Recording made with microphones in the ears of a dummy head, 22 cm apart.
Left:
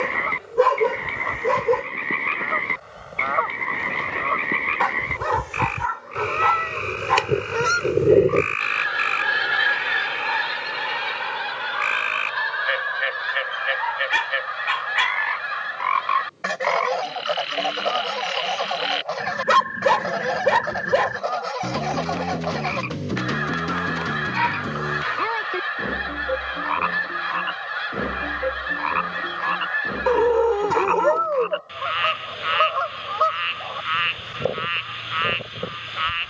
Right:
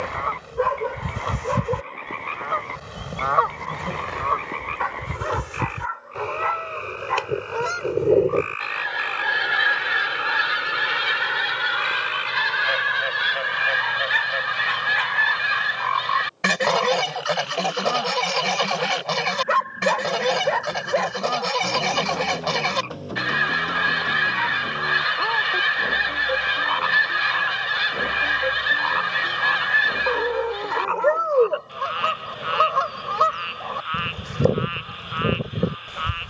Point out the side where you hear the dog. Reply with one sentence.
You can hear the dog on the left.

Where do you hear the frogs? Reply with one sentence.
You can hear the frogs on the left.